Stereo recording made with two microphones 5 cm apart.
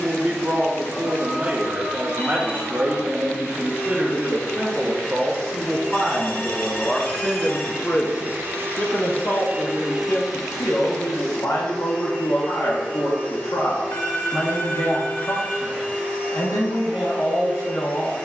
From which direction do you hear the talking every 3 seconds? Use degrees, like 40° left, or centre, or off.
30° right, 20° right, 20° left, 60° left, 70° left, 70° left.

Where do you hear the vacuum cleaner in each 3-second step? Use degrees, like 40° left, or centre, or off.
30° left, 30° left, 10° right, centre, 30° left, 30° left.